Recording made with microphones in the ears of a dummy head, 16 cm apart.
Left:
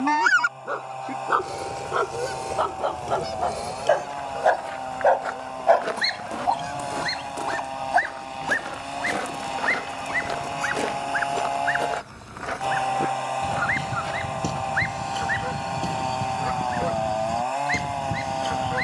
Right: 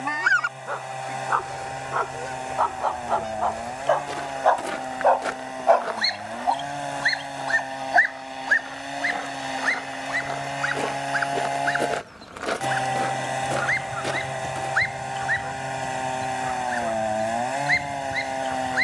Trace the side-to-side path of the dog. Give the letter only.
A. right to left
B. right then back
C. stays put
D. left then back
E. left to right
E.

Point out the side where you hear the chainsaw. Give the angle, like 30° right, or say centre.
10° right.